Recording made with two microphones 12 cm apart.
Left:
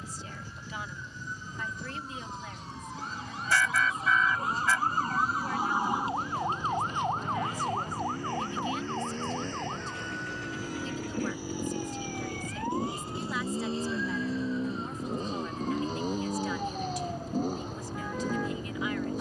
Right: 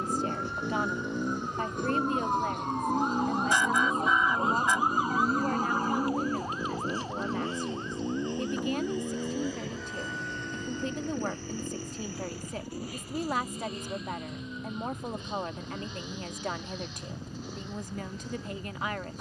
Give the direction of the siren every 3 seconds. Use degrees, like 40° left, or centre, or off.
70° right, 20° right, 50° left, 70° left, 80° left, 80° left, 80° left.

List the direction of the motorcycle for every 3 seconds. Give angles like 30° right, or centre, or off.
70° right, 50° right, 30° right, centre, 30° left, 40° left, 50° left.